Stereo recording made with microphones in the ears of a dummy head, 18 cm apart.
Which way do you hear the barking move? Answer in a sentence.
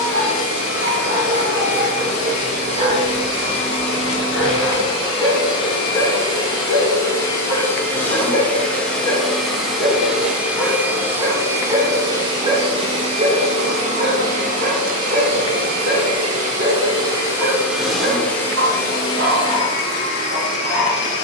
You can hear the barking go left and come back.